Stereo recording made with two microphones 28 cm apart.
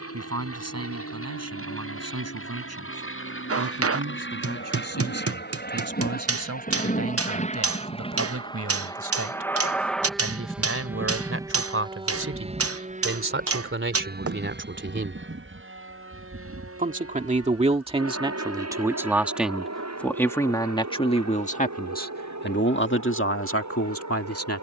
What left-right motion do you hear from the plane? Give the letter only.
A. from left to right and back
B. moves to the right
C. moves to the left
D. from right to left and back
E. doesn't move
B.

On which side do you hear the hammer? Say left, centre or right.
right.